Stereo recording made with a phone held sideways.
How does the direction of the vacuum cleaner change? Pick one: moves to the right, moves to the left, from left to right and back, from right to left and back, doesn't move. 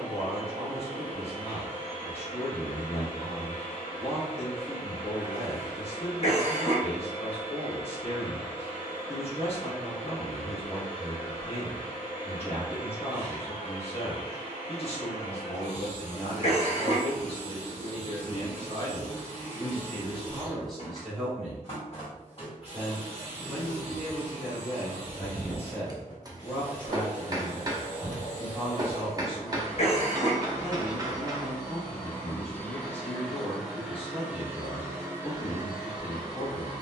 moves to the right.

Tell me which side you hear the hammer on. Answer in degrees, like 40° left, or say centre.
30° right.